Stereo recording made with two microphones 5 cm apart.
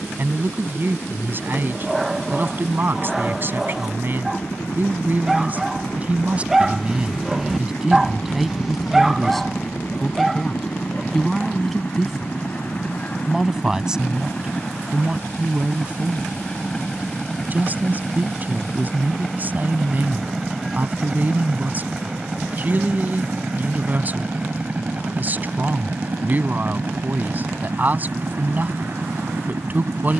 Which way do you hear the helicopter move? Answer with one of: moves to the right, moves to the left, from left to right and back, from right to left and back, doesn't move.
moves to the right.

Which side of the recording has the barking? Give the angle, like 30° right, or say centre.
10° right.